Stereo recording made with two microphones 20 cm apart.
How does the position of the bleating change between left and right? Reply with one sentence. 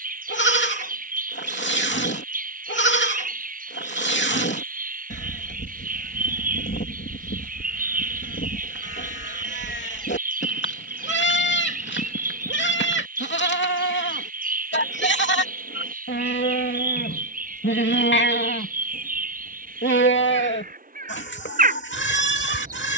In this clip you hear the bleating stay put.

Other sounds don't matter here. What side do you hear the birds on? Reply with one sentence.
In this clip you hear the birds on the right.